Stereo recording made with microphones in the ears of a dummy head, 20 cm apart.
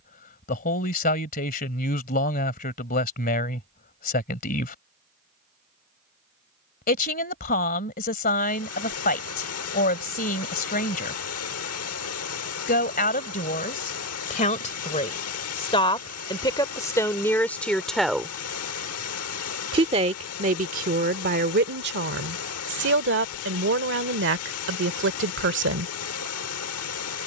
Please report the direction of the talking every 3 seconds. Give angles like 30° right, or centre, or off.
40° left, 40° left, 40° left, 40° left, 40° left, 20° left, 30° right, 50° right, 60° right.